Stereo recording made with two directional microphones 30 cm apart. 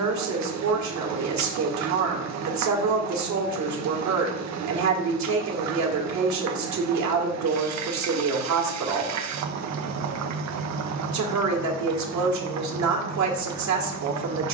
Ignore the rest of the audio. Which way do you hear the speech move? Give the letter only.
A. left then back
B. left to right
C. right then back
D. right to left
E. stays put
E.